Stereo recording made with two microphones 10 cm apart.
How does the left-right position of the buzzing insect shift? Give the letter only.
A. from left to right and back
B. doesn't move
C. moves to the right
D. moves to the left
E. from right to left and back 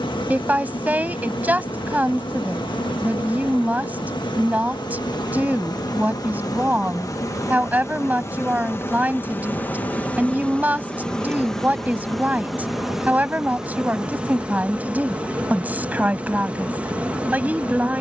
C.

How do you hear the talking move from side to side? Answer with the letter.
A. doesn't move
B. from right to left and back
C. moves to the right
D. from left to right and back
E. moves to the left
A.